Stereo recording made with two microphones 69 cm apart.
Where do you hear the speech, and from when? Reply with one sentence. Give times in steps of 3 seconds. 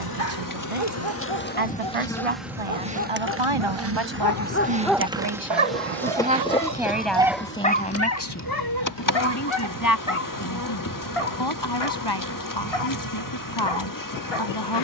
In this clip you hear the speech on the right from 0 s, in the centre from 6 s and on the left from 9 s.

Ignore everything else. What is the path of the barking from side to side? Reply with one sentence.
In this clip you hear the barking move from left to right and back again.